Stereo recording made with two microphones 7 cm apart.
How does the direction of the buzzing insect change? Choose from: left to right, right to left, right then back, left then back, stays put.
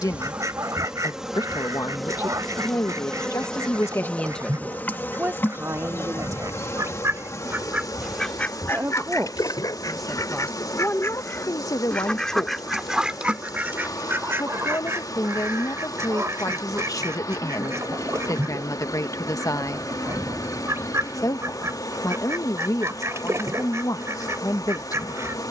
right to left.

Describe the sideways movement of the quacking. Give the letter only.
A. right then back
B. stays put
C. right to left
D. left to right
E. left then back
E.